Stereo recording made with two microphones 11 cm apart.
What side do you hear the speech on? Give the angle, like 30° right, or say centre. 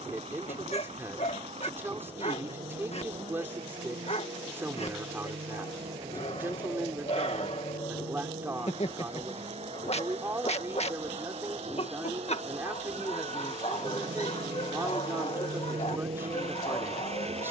20° right.